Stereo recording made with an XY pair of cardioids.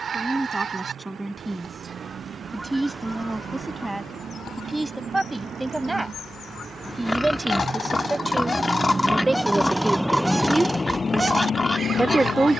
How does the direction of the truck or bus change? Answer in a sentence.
In this clip you hear the truck or bus go from the right side to the left.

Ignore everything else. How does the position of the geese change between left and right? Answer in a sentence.
In this clip you hear the geese go left and come back.